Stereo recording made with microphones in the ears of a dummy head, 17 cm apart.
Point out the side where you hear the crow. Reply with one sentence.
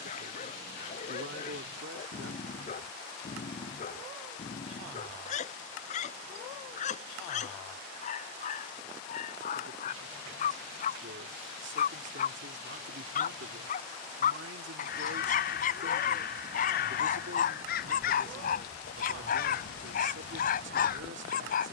In this clip you hear the crow on the left.